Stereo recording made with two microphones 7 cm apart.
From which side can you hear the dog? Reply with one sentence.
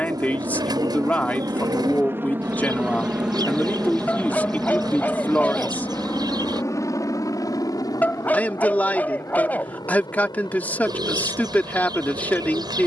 In this clip you hear the dog on the left.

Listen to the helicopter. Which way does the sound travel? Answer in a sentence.
You can hear the helicopter move from right to left.